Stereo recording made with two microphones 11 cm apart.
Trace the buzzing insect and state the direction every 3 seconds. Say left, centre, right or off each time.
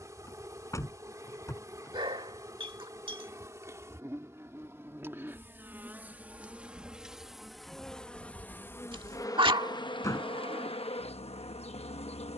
right, right, centre, left.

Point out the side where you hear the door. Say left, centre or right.
left.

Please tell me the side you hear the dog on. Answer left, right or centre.
right.